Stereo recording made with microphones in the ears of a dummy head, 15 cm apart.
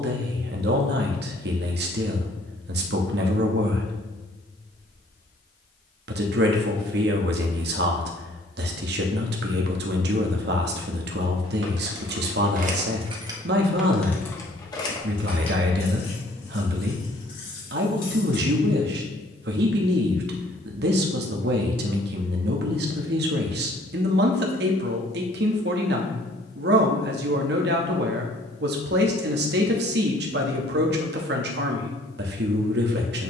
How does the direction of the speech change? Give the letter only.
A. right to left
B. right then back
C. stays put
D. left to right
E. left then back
C.